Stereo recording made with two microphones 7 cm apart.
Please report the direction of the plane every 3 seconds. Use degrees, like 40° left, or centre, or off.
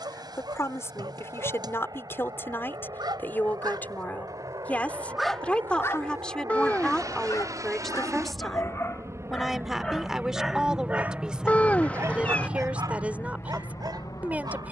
70° right, 60° right, 50° right, 20° right, 30° left.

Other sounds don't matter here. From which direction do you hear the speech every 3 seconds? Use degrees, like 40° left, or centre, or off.
40° left, 20° left, 10° left, 10° right, 20° right.